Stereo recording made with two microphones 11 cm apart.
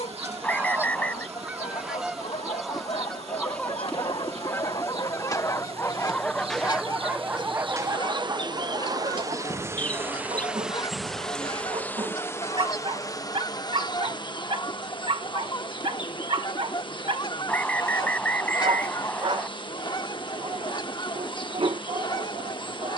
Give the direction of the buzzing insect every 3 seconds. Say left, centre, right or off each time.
right, right, right, centre, left, left, left, left.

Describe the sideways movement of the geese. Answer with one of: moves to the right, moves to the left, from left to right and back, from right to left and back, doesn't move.
moves to the left.